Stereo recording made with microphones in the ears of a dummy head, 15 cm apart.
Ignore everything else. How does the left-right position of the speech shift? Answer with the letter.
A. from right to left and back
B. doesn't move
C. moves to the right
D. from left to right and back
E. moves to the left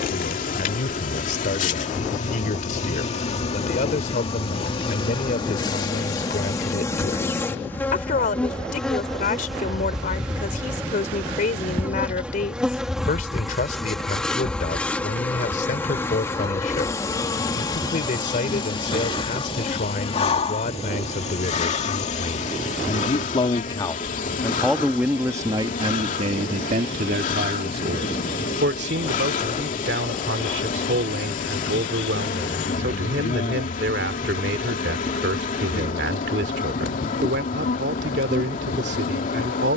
C.